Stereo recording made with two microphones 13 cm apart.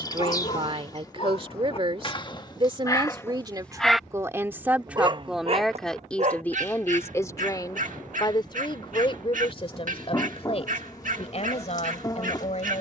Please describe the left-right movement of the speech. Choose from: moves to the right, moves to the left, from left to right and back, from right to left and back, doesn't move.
moves to the left.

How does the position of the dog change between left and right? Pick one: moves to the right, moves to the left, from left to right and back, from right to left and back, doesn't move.
moves to the right.